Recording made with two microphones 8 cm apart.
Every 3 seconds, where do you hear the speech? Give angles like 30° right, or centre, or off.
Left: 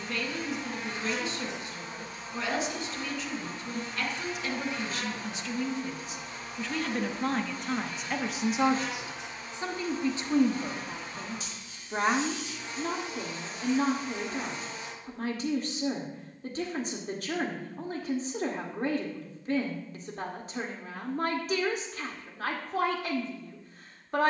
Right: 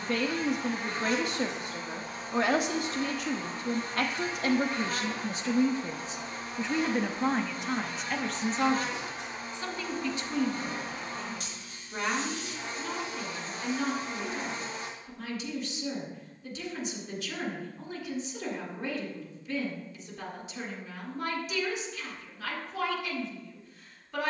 60° right, 50° right, centre, 30° left, 50° left, 50° left, 50° left, 50° left.